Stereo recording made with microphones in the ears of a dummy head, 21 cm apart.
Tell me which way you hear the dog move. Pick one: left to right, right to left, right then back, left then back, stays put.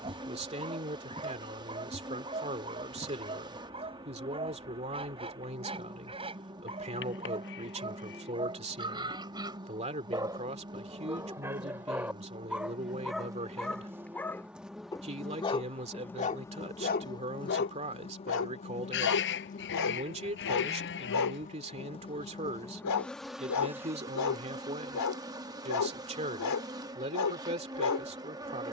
right to left.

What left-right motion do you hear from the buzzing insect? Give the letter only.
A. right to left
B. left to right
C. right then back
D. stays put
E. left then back
E.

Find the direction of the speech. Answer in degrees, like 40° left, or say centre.
30° right.